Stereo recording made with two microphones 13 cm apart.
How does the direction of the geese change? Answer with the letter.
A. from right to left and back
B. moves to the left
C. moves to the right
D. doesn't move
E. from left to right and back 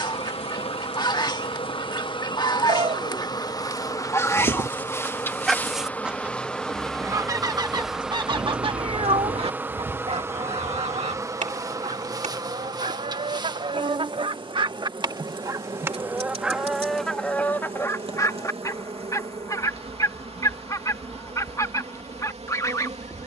E.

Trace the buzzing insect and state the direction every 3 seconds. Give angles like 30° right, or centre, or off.
40° left, 20° left, centre, 20° right, 30° right, 40° right, 50° right, 50° right.